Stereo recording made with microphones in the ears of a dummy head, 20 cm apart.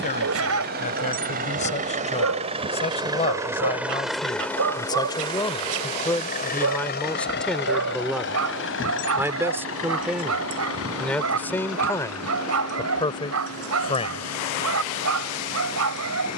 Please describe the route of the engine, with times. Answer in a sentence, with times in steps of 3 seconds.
You can hear the engine on the right from 0 s, in the centre from 3 s and on the left from 6 s.